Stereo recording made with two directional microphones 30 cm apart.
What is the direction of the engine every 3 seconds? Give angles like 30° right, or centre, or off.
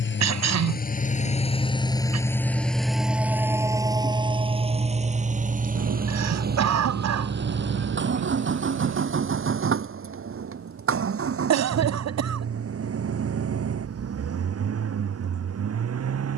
20° left, 20° right, 40° right, 50° right, 50° right, 50° right.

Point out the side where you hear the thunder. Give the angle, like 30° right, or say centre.
70° right.